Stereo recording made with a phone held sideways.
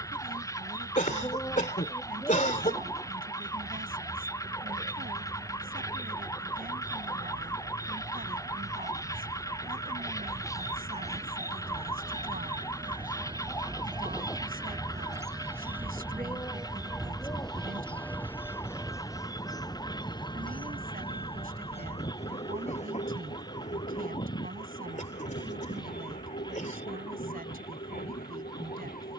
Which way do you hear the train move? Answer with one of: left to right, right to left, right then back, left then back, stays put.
right to left.